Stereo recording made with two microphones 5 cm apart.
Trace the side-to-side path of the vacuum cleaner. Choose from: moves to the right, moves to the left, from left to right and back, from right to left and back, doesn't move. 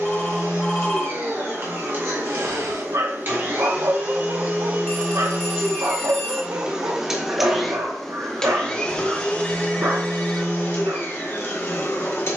moves to the left.